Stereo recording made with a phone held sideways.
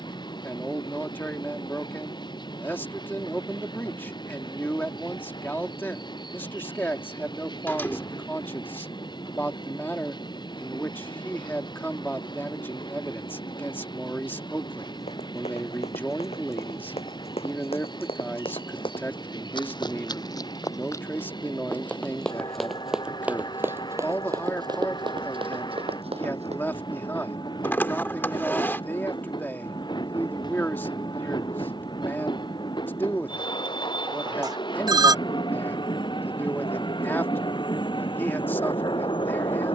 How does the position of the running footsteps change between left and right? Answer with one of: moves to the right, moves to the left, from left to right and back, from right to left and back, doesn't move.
moves to the right.